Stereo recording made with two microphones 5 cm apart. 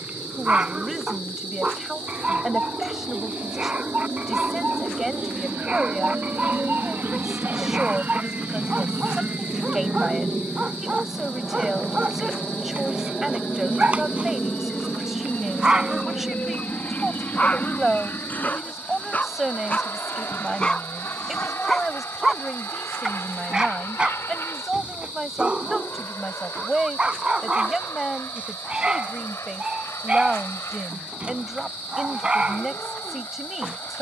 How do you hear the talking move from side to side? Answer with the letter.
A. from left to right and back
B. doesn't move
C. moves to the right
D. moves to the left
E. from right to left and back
B.